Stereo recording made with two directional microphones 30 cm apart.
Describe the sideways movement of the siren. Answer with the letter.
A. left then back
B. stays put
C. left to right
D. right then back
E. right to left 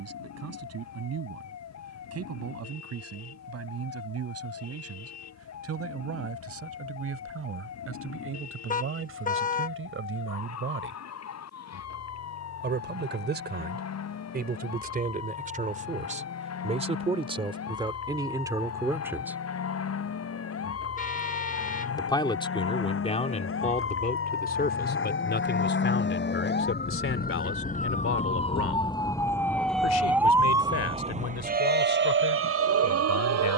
C.